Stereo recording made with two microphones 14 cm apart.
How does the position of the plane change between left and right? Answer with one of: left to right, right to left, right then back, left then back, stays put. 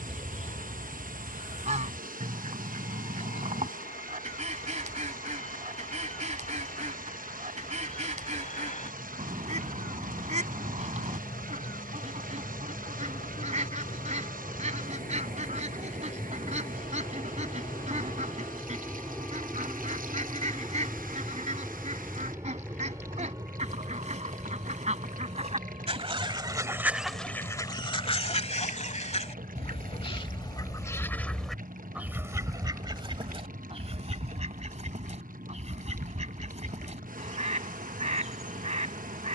left to right.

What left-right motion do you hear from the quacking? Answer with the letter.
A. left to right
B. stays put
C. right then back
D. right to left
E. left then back
E.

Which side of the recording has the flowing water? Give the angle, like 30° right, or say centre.
80° right.